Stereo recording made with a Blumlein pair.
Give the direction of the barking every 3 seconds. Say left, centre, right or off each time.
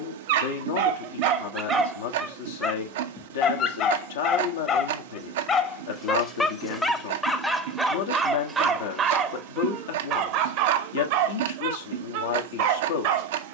right, left, centre, right, right.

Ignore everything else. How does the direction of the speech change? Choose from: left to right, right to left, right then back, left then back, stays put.
stays put.